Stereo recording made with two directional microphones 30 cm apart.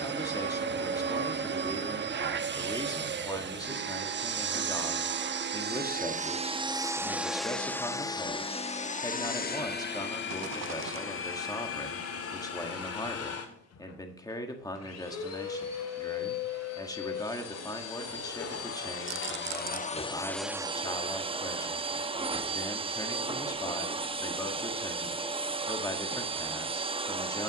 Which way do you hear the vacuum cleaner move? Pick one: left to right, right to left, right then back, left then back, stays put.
left then back.